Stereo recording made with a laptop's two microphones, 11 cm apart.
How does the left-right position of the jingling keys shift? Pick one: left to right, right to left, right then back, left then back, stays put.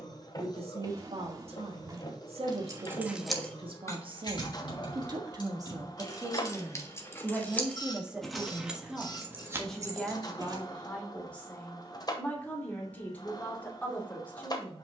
left then back.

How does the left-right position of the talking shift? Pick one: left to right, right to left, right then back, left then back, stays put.
right to left.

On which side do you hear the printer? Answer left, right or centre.
left.